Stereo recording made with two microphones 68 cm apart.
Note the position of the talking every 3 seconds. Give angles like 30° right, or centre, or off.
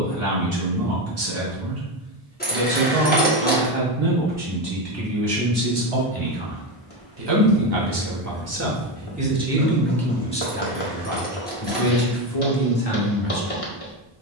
70° right, 60° right, 30° right, 10° left, 50° left.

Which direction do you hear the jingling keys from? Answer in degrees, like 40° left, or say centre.
10° left.